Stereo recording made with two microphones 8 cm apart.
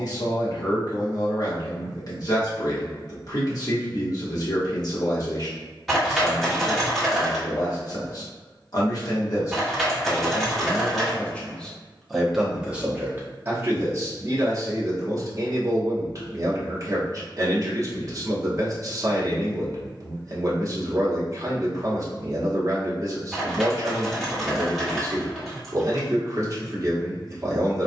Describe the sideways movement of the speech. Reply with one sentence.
You can hear the speech travel towards the right.